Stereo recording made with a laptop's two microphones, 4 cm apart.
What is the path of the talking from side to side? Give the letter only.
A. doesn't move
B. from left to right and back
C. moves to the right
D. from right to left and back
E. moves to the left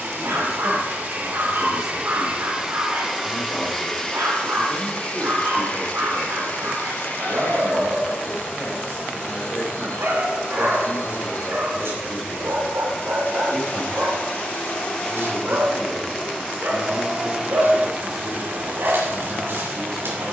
A.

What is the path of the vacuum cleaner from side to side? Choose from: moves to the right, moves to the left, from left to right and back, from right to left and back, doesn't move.
from right to left and back.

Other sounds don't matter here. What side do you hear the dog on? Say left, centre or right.
right.